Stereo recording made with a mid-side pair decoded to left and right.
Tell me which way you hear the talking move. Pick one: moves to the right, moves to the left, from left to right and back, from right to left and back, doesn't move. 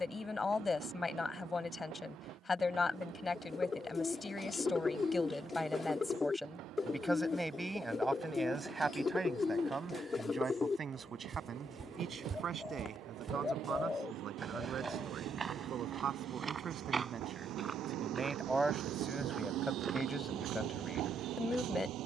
from left to right and back.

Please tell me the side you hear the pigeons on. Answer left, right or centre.
left.